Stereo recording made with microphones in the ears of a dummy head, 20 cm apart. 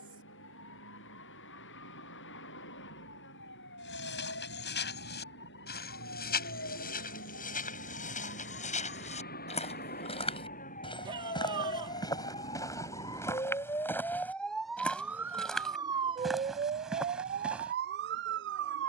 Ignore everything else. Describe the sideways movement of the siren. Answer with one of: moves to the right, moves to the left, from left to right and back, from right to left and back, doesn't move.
moves to the right.